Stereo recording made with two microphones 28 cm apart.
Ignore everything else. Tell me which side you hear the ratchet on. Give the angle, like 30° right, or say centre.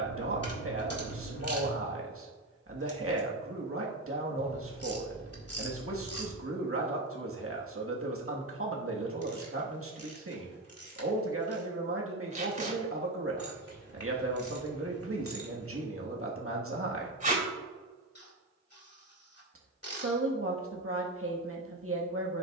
60° left.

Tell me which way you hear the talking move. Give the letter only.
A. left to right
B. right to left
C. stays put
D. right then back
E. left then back
C.